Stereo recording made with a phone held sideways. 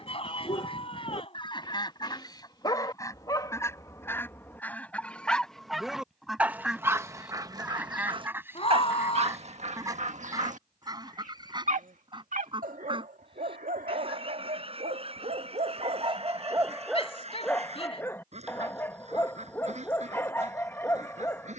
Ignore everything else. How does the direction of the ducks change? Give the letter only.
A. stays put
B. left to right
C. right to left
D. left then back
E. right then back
B.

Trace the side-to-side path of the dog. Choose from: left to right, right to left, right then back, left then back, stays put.
right then back.